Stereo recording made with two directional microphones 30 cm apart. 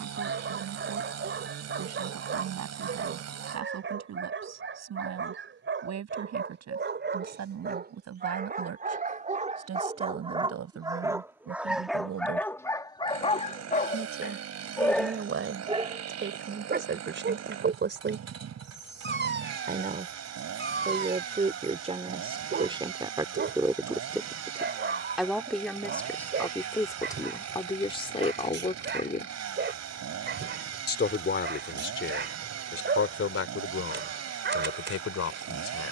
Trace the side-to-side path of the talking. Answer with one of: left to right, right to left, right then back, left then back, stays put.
right to left.